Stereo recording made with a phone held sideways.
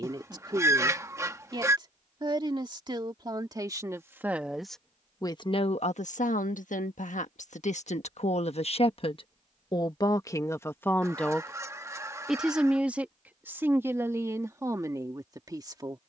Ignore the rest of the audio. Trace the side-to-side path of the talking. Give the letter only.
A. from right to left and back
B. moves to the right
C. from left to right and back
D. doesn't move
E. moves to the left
A.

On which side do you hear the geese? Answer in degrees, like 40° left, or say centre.
20° right.